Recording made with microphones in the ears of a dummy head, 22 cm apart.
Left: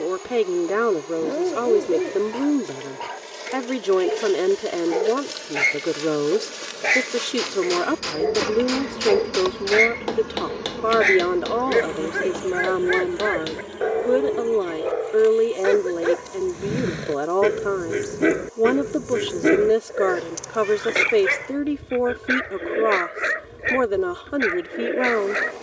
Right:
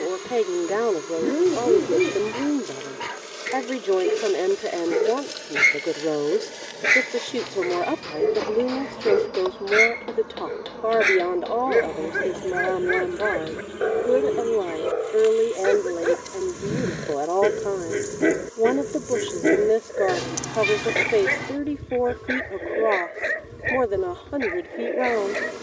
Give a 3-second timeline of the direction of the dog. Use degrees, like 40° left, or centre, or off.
30° right, 30° right, 20° right, 10° right, 10° right, centre, 10° left, 20° left, 20° left.